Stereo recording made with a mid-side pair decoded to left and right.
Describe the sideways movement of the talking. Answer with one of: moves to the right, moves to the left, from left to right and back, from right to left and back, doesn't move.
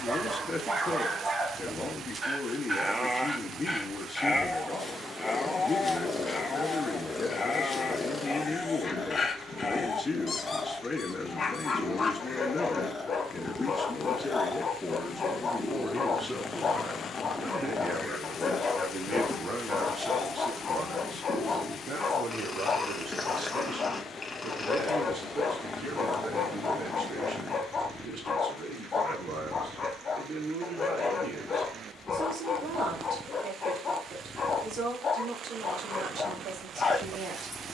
moves to the right.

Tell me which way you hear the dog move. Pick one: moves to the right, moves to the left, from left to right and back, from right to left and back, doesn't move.
moves to the left.